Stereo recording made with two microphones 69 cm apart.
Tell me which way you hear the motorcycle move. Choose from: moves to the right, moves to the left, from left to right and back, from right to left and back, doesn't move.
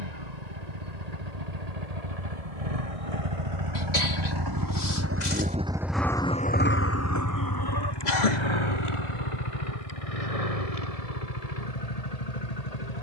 moves to the left.